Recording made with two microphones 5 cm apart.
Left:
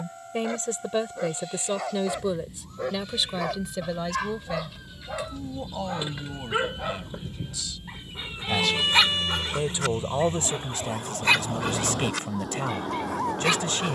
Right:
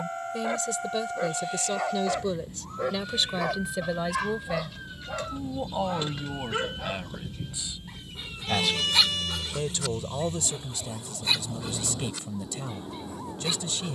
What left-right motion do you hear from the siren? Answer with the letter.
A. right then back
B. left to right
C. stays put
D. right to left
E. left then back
D.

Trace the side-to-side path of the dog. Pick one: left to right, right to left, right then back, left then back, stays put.
right to left.